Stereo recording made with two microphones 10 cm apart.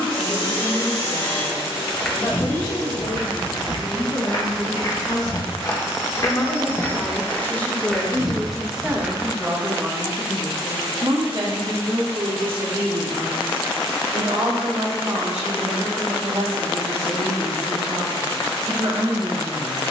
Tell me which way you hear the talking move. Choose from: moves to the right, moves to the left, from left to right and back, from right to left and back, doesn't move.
moves to the right.